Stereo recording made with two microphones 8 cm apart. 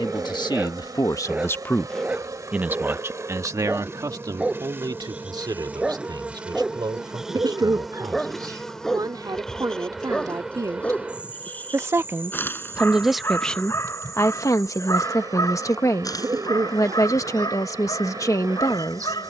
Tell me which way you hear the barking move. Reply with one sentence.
In this clip you hear the barking move from right to left.